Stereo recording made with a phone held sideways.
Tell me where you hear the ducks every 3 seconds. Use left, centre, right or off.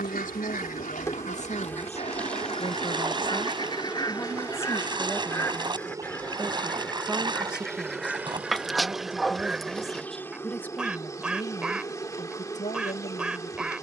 left, left, centre, centre, centre.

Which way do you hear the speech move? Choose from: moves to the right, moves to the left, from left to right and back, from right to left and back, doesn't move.
from left to right and back.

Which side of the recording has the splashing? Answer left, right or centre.
right.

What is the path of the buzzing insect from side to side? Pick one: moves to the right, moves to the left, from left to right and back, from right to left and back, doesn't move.
from left to right and back.